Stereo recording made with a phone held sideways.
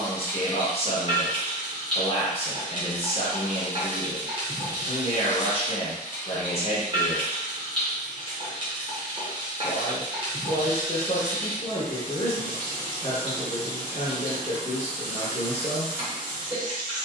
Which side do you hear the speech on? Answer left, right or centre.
left.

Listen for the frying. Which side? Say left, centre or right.
right.